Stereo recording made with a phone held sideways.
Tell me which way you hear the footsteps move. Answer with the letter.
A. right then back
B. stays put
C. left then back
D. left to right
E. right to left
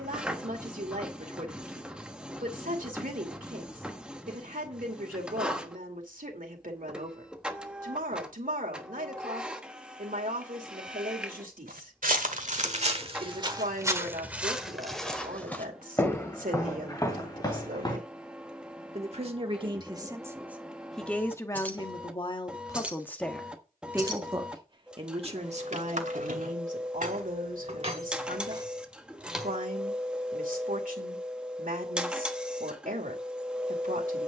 E.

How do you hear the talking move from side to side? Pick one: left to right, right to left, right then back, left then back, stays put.
left then back.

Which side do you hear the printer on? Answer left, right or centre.
centre.